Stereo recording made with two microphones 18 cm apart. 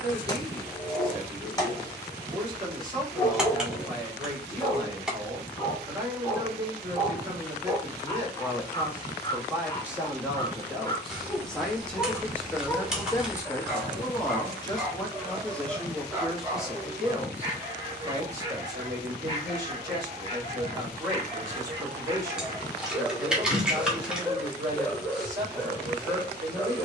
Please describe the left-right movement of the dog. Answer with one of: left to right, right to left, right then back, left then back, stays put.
right then back.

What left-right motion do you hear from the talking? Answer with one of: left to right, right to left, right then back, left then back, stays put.
left then back.